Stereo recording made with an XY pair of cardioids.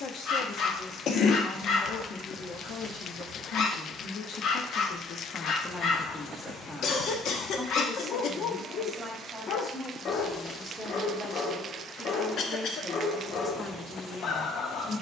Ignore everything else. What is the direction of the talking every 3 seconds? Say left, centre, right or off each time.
left, left, centre, centre, left.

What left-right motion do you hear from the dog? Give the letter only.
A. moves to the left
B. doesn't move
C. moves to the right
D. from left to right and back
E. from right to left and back
B.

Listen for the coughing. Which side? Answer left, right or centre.
left.